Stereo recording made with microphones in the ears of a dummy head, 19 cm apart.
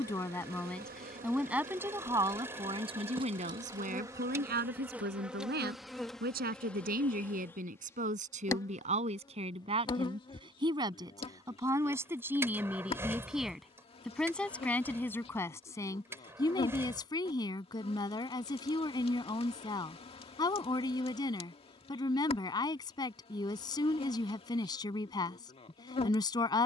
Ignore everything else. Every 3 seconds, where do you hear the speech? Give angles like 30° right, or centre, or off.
10° right, 40° right, 40° right, 20° right, centre, 20° left, 20° left, 20° left, 20° left.